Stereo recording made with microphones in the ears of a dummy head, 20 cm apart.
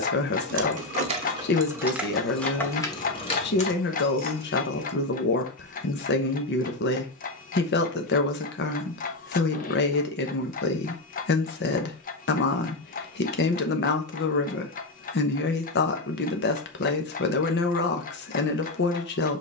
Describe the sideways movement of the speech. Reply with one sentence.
In this clip you hear the speech stay in one place.